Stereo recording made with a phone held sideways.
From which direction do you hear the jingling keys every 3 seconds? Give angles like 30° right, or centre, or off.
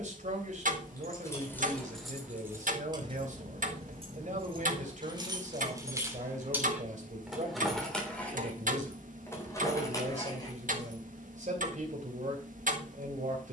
centre, 40° right, centre, 30° left, off.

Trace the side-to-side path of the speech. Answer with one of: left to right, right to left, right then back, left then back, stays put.
stays put.